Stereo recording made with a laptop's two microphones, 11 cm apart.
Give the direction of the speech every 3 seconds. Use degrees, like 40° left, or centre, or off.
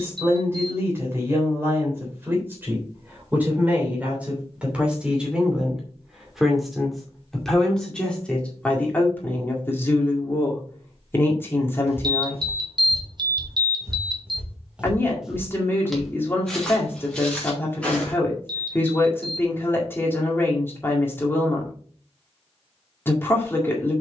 20° right, 10° right, 10° left, 20° left, 20° left, 20° left, 20° left, 20° left.